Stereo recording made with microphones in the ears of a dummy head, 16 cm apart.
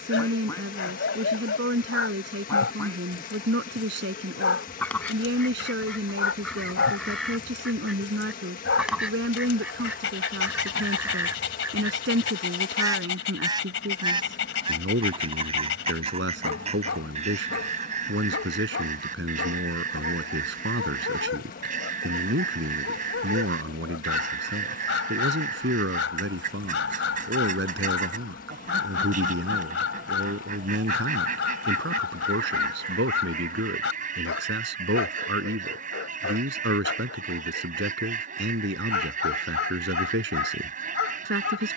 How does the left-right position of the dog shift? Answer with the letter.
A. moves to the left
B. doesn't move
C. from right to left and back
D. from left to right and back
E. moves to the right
B.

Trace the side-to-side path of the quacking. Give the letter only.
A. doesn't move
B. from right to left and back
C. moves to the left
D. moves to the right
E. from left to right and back
D.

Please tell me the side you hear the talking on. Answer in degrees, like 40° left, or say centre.
80° right.